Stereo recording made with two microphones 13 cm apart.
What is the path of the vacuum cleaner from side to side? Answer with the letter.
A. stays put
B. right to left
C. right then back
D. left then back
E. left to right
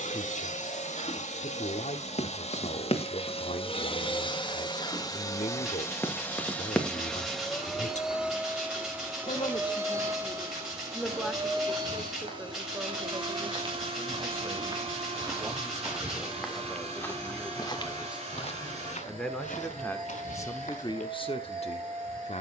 E.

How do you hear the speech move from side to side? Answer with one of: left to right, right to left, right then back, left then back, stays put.
right then back.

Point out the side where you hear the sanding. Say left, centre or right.
centre.